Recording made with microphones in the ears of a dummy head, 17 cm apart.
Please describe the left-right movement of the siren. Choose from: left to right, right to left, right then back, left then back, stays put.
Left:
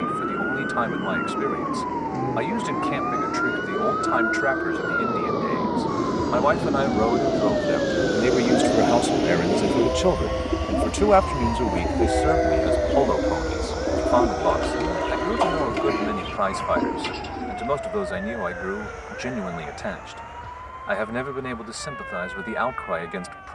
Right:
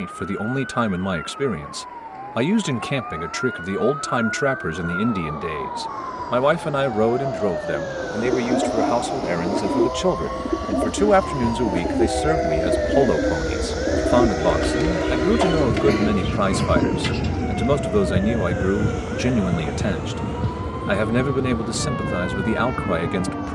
left to right.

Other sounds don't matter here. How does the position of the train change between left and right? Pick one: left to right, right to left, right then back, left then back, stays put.
left to right.